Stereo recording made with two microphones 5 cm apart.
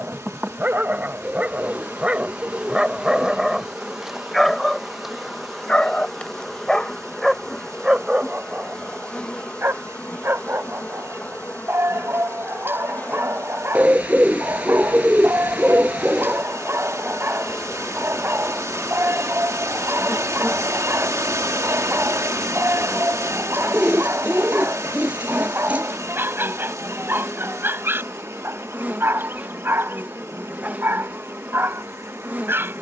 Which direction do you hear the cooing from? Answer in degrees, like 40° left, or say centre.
30° right.